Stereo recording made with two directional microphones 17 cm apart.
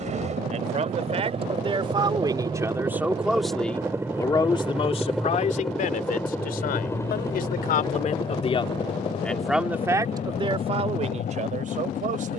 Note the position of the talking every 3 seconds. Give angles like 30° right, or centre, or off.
30° right, 30° left, 50° left, 30° right.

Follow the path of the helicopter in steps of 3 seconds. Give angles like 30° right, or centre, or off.
30° right, 10° right, 20° left, 40° left.